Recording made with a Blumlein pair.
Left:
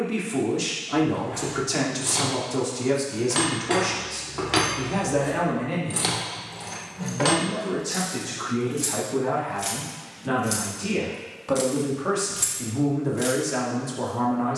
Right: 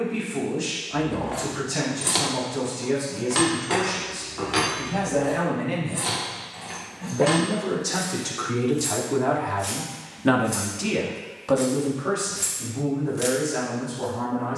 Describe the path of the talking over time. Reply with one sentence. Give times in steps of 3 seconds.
You can hear the talking on the left from 0 s, on the right from 6 s and on the left from 12 s.